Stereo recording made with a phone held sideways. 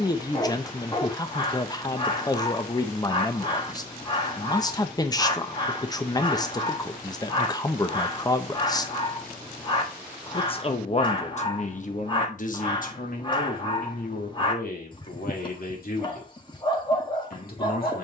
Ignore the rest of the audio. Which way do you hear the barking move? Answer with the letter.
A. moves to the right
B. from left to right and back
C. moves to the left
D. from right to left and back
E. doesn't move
E.